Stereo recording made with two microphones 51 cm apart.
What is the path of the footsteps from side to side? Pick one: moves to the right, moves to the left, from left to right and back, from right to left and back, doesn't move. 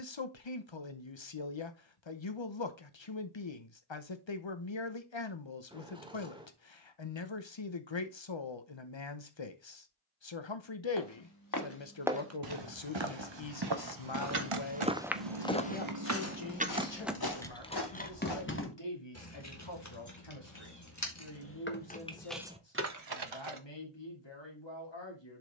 from left to right and back.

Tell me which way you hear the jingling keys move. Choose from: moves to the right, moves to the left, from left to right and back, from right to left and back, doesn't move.
from right to left and back.